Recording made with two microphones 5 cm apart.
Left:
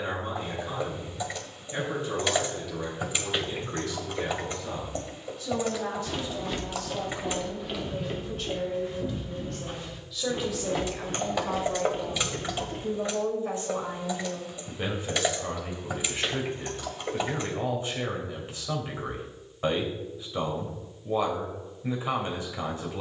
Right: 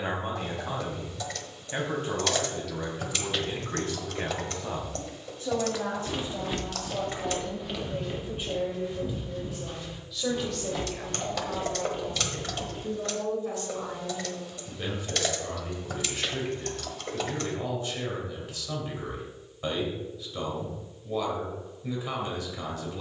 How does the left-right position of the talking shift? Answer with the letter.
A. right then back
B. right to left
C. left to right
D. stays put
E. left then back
B.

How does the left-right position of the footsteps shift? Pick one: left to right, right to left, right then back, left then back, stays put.
right to left.